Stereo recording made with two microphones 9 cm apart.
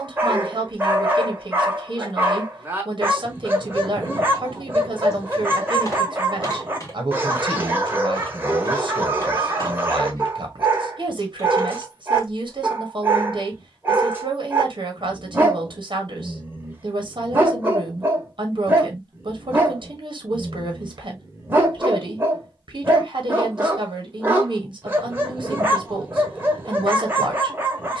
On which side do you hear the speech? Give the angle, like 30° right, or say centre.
60° right.